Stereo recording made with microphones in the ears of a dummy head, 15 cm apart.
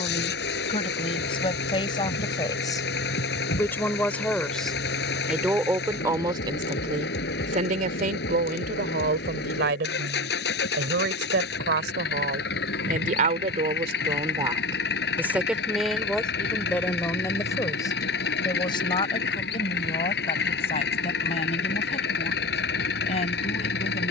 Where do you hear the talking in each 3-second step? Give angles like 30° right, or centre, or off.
30° left, centre, 40° right, 70° right, 40° right, 10° left, 30° left, 40° left.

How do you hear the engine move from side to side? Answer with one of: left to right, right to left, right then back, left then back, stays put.
stays put.